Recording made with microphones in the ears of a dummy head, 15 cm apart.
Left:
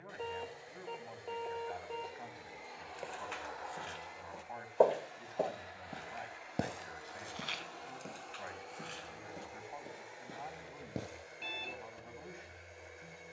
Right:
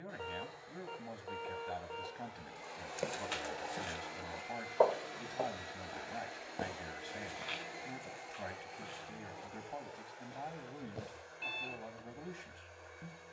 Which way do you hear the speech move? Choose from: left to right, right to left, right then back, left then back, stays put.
stays put.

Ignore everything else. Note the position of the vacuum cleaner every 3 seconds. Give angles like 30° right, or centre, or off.
20° left, 50° right, 20° right, 10° left, 20° left.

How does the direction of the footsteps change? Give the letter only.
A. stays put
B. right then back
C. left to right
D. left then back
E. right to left
E.